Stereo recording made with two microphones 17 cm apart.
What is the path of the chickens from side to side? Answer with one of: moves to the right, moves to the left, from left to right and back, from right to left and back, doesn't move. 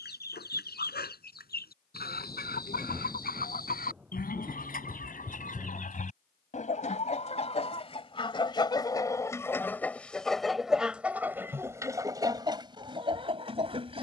moves to the right.